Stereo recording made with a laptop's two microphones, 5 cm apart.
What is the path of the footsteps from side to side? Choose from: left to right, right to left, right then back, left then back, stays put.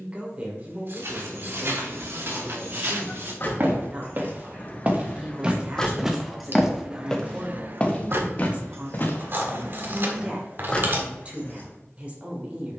right to left.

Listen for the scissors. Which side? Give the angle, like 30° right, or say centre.
50° right.